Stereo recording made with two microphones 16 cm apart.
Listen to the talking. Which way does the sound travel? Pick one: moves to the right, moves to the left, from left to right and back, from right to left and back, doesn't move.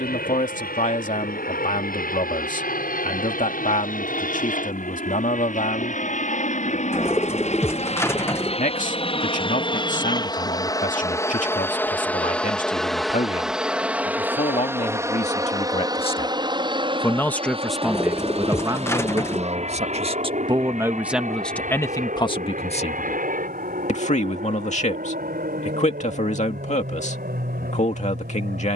from left to right and back.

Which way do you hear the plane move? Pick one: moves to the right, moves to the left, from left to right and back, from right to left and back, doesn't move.
moves to the right.